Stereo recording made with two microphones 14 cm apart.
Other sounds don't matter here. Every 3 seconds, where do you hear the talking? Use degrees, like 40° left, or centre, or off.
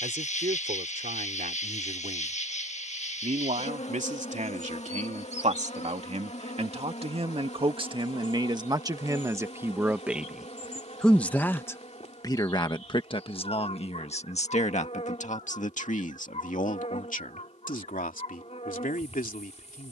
70° right, 60° right, 40° right, centre, 40° left, 60° left, 70° left.